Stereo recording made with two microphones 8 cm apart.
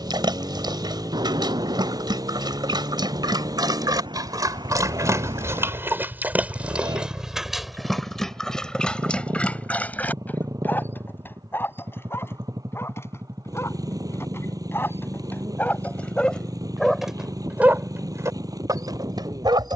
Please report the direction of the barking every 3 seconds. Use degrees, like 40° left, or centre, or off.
70° right, 50° right, centre, 20° left, 30° left, 10° left, 60° right.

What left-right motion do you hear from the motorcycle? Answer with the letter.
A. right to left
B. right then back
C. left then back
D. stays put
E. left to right
D.